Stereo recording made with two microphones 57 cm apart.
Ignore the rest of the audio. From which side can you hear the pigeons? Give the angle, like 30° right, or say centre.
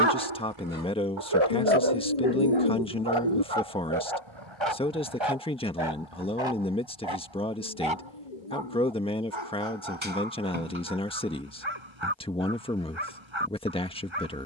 80° left.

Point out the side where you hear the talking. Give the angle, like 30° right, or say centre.
10° left.